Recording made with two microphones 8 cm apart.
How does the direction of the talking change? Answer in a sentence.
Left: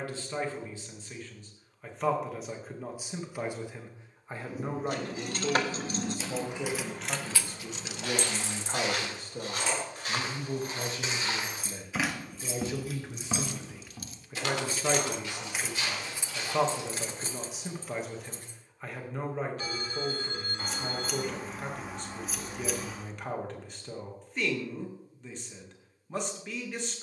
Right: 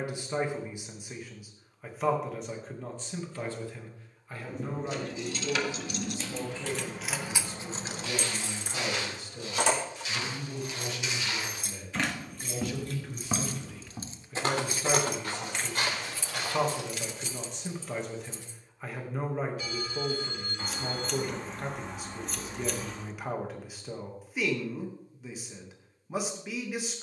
In this clip you hear the talking move from right to left and back again.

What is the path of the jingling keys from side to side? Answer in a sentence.
You can hear the jingling keys go right and come back.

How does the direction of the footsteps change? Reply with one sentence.
In this clip you hear the footsteps go from the left side to the right.